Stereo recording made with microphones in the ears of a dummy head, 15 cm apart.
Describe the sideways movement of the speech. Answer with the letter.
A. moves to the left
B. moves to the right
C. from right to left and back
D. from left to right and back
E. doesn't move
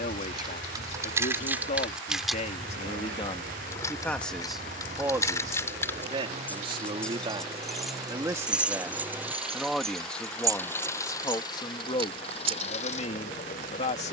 D.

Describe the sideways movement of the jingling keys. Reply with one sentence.
You can hear the jingling keys go left and come back.